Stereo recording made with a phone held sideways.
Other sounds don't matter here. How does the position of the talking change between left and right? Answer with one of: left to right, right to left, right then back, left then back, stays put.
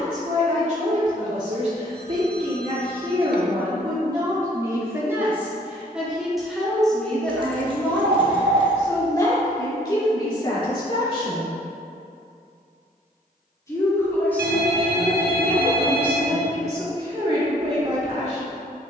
left then back.